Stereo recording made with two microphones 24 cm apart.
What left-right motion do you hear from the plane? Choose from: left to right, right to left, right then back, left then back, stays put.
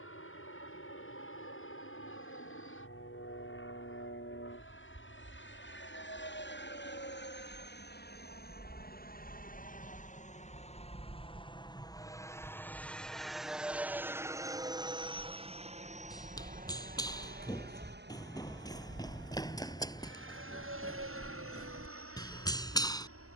left to right.